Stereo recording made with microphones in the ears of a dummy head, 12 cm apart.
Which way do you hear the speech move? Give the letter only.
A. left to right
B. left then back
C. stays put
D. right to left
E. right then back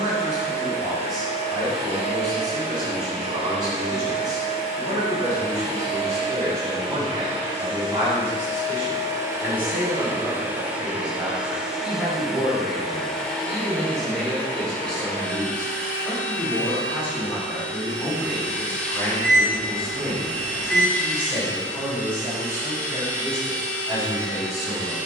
B.